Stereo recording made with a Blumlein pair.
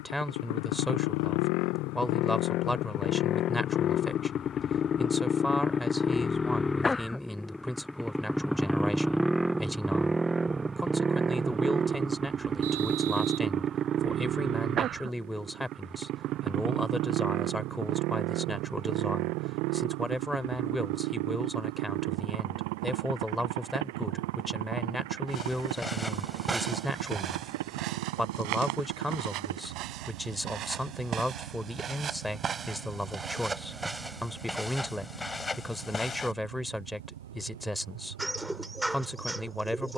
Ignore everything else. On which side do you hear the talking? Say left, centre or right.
centre.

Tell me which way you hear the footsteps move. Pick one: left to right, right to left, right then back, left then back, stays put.
right then back.